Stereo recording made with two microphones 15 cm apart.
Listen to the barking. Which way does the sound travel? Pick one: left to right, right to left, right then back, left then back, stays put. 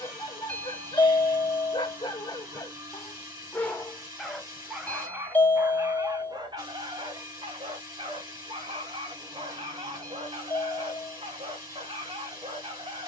left to right.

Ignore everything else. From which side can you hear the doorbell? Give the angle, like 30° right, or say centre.
10° left.